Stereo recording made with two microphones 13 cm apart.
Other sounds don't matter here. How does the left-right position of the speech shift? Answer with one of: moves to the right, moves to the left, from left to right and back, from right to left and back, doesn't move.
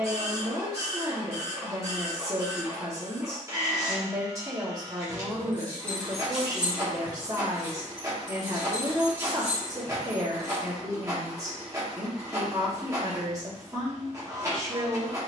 doesn't move.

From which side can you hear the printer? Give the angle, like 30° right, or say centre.
20° right.